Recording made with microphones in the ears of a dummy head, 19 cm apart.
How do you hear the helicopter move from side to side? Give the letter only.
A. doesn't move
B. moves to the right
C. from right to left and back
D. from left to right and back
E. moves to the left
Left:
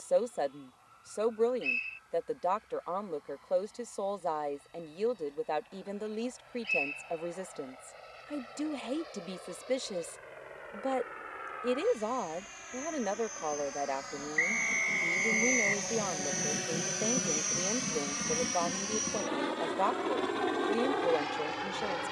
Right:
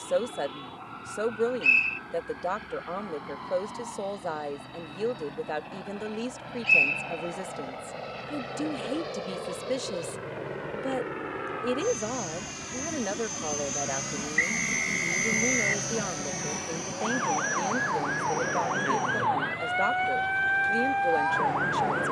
E.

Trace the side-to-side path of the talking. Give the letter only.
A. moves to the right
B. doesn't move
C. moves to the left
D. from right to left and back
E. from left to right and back
B.